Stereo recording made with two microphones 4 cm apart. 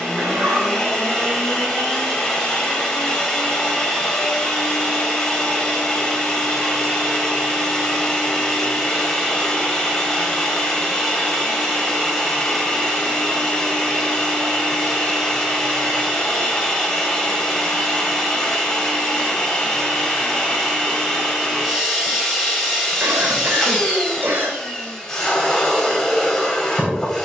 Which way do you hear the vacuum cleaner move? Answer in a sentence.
In this clip you hear the vacuum cleaner stay in one place.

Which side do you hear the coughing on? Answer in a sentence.
You can hear the coughing on the right.